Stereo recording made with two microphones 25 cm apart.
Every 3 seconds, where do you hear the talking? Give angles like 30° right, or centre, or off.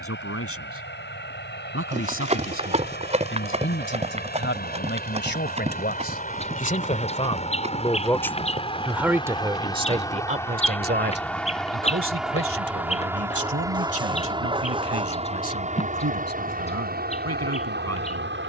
60° left, 50° left, 20° left, 30° right, 60° right, 80° right.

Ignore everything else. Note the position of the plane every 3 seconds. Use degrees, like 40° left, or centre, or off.
50° left, 40° left, 30° left, 10° left, 10° right, 30° right.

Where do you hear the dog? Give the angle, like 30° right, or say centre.
20° right.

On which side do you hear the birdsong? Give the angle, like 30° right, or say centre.
20° left.